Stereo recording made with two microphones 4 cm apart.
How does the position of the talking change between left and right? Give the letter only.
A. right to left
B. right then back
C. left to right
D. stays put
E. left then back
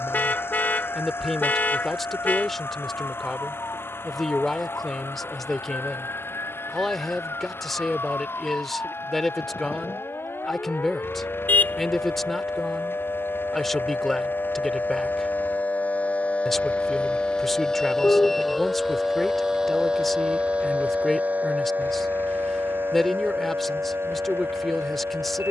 D.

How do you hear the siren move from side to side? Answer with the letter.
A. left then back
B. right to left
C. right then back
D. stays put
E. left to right
E.